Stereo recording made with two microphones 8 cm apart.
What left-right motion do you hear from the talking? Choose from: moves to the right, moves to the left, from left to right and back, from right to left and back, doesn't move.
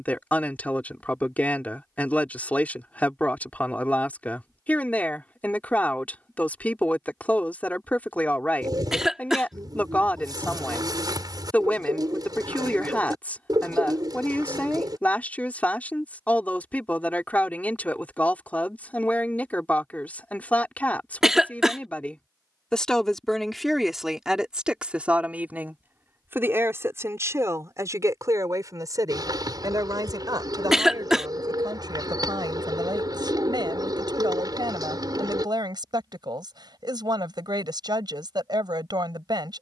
moves to the right.